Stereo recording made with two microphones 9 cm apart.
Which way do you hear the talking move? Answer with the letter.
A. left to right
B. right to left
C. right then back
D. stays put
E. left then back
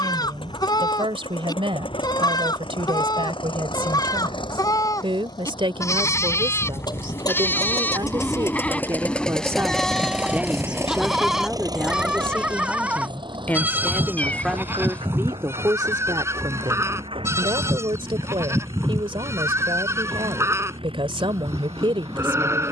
E.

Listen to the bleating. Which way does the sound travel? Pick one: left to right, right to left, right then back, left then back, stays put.
left to right.